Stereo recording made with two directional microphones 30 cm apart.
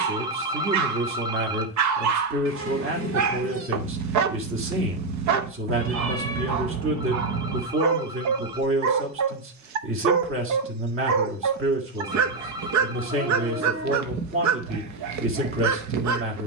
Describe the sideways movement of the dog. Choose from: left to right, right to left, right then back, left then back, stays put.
stays put.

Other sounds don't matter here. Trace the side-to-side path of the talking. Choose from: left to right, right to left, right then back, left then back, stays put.
stays put.